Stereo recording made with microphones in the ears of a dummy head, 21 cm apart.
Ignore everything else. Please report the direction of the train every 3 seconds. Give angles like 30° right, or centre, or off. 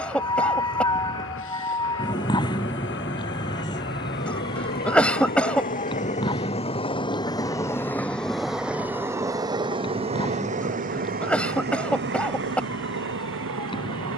60° left, 50° left, 10° left, 30° right, 50° right.